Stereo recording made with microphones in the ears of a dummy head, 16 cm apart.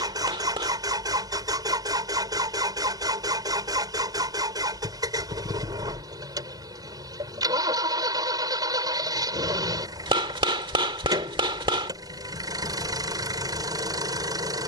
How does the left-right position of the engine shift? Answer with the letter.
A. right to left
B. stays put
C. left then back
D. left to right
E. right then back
B.